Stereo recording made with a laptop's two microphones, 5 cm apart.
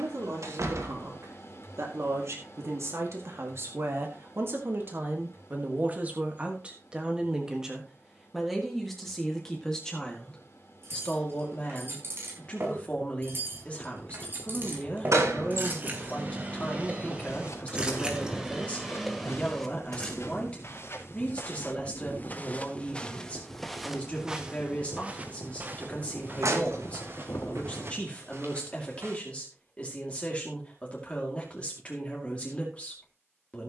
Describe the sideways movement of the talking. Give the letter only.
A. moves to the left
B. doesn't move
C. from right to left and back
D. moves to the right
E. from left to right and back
A.